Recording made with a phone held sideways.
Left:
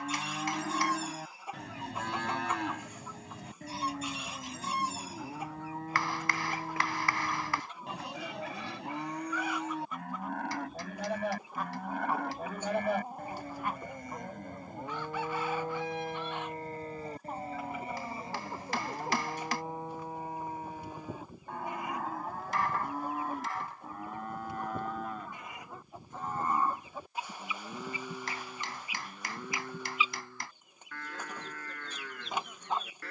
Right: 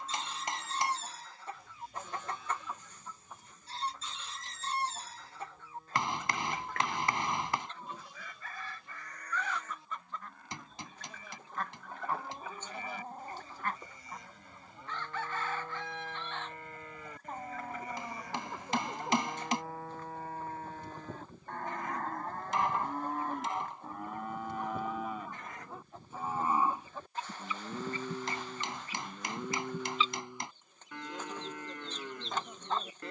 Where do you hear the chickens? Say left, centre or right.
centre.